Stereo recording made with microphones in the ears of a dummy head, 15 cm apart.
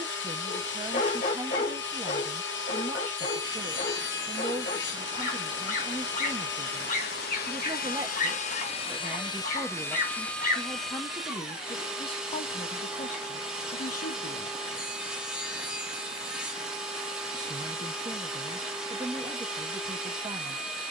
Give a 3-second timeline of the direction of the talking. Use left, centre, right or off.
right, right, right, centre, left, right, right.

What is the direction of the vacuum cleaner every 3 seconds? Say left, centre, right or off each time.
left, left, left, centre, centre, centre, centre.